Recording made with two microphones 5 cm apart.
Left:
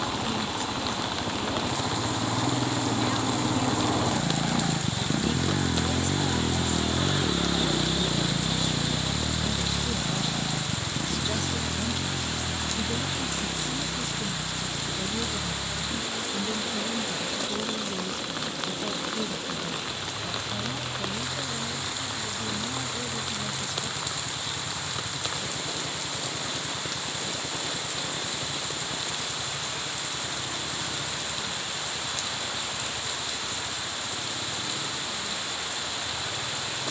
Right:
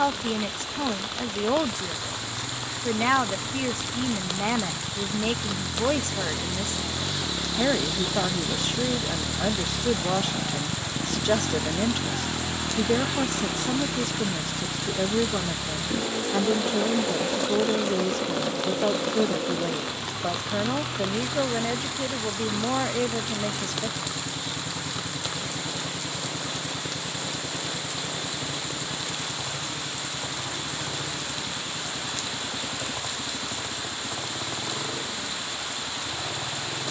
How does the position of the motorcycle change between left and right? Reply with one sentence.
In this clip you hear the motorcycle move from left to right.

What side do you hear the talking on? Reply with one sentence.
You can hear the talking on the right.